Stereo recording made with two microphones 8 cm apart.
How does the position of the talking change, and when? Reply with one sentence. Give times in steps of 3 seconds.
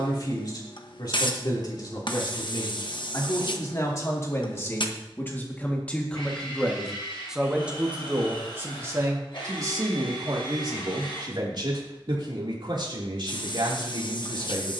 In this clip you hear the talking on the left from 0 s, in the centre from 6 s and on the right from 9 s.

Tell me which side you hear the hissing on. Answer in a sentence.
You can hear the hissing on the left.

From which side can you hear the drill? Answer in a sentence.
You can hear the drill on the left.